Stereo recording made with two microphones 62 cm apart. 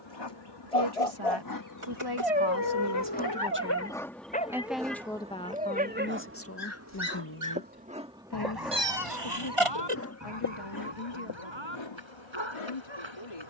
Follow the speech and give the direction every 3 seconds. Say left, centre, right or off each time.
right, centre, left, left, left.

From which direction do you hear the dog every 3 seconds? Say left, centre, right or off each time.
left, centre, right, right, right.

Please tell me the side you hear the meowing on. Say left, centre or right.
right.